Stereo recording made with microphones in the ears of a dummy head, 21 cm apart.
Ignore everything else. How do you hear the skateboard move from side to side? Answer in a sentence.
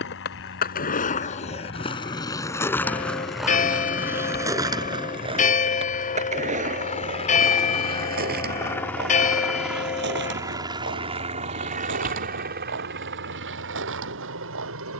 In this clip you hear the skateboard move to the right.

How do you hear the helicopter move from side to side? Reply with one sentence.
In this clip you hear the helicopter move to the right.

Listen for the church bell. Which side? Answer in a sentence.
In this clip you hear the church bell on the left.